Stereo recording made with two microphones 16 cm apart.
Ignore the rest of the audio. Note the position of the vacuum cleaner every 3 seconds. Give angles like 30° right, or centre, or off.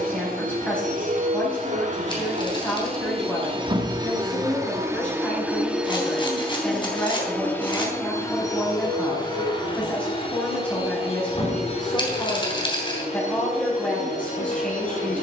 50° right, 20° right, 10° left, 40° left, 50° left.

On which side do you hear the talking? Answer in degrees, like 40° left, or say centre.
10° left.